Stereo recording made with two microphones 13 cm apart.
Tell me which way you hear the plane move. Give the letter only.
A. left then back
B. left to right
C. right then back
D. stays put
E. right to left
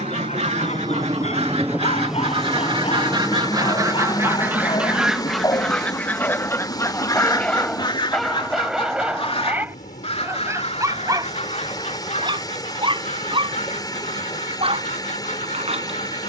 E.